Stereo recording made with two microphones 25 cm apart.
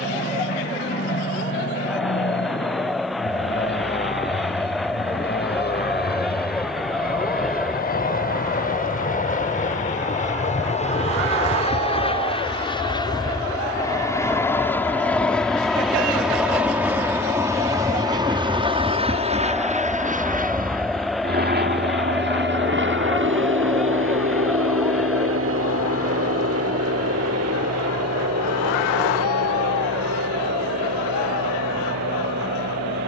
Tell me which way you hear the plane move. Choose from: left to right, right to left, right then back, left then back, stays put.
left to right.